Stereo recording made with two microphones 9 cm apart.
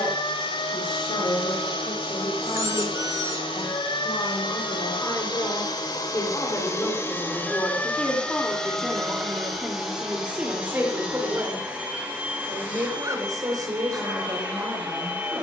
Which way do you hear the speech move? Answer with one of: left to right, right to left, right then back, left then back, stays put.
left to right.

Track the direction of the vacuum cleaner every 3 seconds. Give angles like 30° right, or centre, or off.
80° left, 70° left, 20° left, 10° right, 20° right.